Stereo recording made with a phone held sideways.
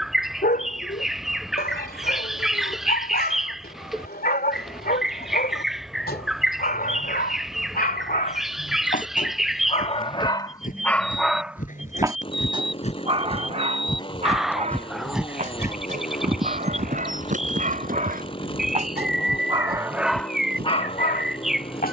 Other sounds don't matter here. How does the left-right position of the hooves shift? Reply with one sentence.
In this clip you hear the hooves move to the right.